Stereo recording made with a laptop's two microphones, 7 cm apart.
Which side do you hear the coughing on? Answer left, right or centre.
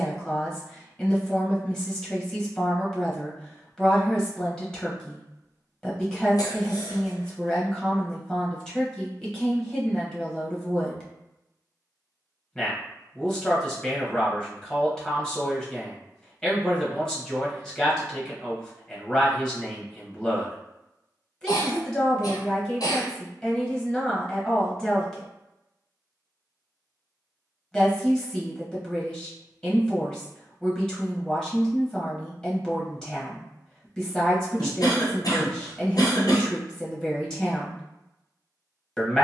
left.